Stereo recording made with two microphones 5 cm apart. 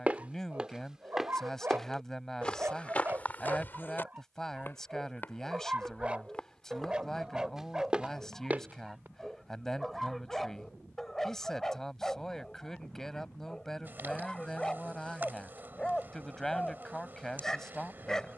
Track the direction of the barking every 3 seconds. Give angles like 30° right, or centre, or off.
40° right, 30° right, 20° right, centre, 10° left, 10° left.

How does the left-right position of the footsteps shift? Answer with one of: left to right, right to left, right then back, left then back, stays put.
left then back.